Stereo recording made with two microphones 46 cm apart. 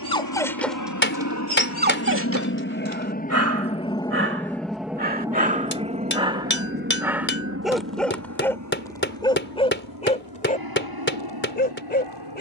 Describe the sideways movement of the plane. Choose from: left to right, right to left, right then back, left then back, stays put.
left to right.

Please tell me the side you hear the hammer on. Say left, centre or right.
left.